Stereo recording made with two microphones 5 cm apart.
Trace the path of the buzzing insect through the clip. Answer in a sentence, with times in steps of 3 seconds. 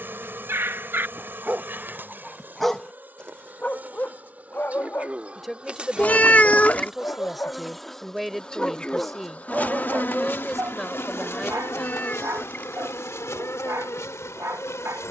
In this clip you hear the buzzing insect on the right from 0 s, in the centre from 6 s and on the left from 9 s.